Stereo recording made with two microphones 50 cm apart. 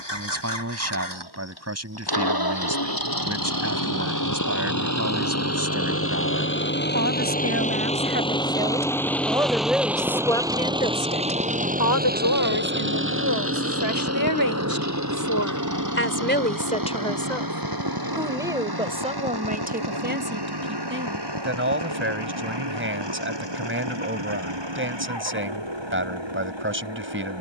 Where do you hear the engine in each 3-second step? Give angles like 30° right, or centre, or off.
50° left, 40° left, 20° left, 10° right, 30° right, 40° right, 50° right, 60° right, 60° right.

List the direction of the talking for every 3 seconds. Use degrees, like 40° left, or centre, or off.
30° right, 30° right, 20° right, 10° left, 50° left, 20° left, 20° right, 20° right, 20° right.